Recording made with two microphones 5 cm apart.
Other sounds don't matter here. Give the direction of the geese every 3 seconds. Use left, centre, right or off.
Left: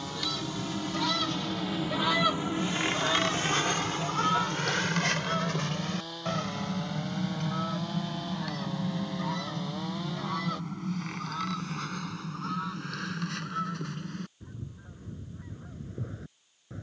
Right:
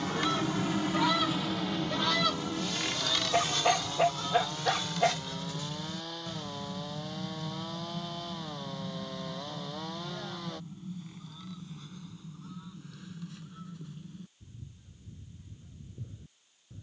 centre, left, left, left, left, left.